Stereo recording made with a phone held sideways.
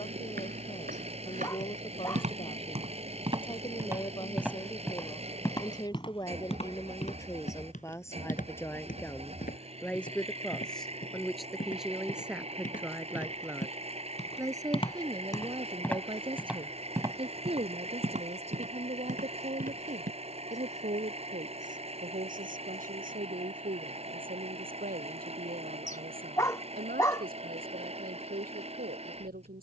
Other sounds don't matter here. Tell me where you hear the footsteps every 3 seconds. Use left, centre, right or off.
right, centre, left, left, left, centre, right, off, off, off.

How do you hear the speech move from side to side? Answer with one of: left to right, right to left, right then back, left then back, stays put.
left to right.